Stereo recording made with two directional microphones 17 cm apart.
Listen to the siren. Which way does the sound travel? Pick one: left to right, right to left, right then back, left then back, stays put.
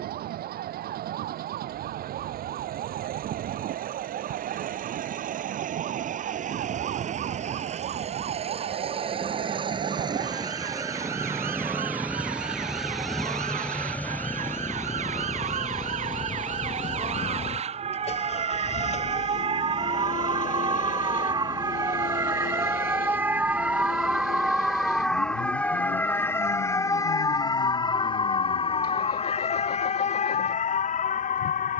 right to left.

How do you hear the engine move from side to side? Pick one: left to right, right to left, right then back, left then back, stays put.
right to left.